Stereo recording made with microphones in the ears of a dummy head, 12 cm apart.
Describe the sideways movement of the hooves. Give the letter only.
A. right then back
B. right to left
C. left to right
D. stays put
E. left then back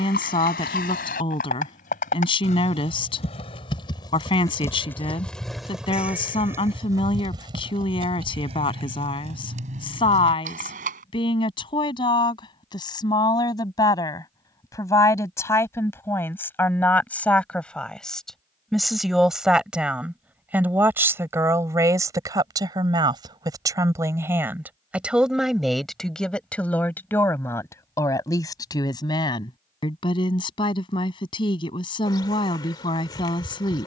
C.